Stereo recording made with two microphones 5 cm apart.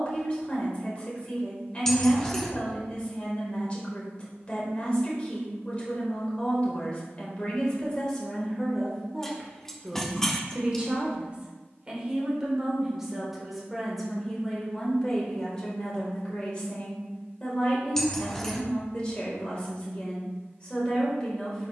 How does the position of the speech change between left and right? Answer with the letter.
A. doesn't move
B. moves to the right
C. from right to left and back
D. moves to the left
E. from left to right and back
E.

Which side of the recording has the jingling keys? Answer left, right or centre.
centre.